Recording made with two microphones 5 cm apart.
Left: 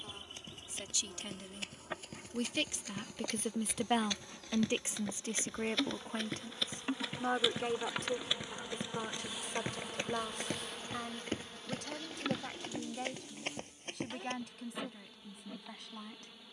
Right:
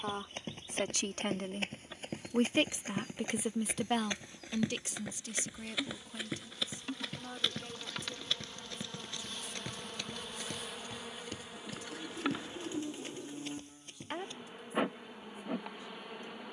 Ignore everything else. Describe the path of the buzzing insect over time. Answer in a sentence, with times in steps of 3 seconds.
In this clip you hear the buzzing insect on the left from 0 s, in the centre from 9 s and on the right from 12 s.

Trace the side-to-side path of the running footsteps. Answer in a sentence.
In this clip you hear the running footsteps travel towards the left.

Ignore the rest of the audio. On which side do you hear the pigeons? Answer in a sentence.
In this clip you hear the pigeons on the right.